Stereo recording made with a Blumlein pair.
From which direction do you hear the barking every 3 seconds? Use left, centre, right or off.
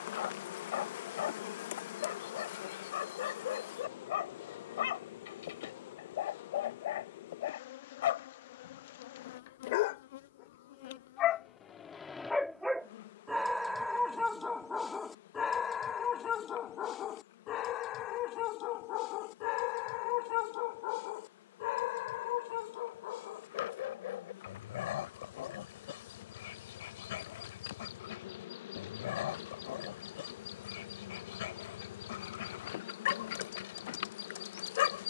left, left, left, left, centre, left, left, left, left, left, left, left.